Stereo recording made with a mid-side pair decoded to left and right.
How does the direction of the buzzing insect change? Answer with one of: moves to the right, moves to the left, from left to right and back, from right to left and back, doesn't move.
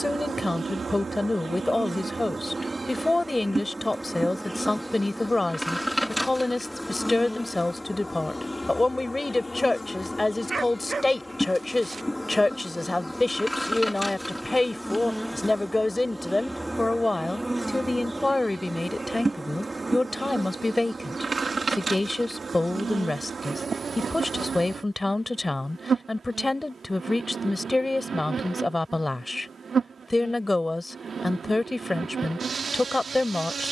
from right to left and back.